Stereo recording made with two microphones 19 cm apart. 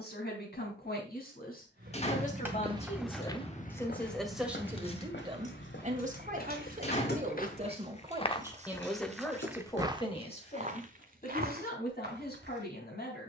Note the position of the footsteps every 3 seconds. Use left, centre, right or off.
right, left, left, right, right.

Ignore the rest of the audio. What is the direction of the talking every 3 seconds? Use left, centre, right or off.
left, centre, right, left, left.